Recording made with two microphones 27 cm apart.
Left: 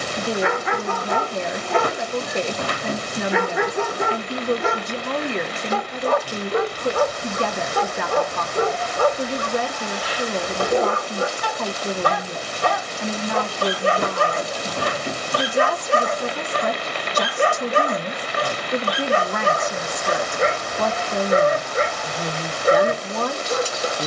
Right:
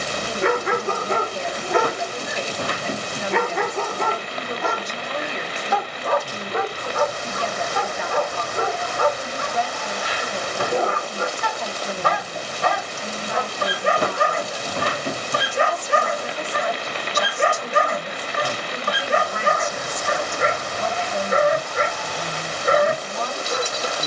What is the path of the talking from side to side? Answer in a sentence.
You can hear the talking stay in one place.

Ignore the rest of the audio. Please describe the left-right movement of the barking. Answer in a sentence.
You can hear the barking move from right to left.